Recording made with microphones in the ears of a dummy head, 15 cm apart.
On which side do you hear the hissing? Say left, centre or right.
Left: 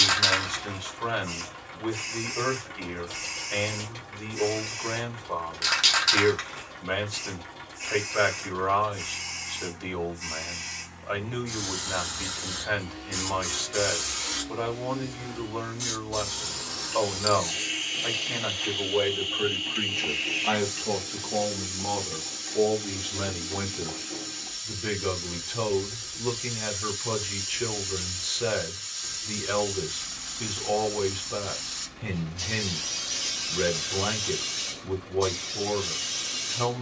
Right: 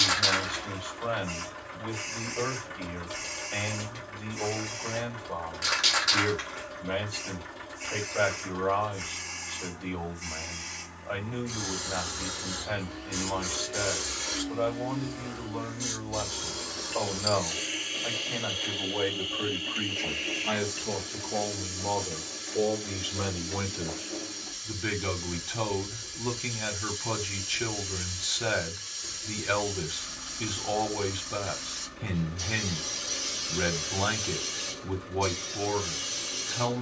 left.